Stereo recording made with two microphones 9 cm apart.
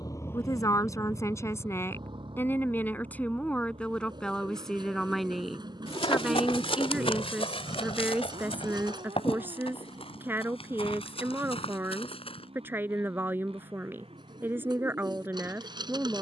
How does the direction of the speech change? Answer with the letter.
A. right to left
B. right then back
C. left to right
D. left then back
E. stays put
C.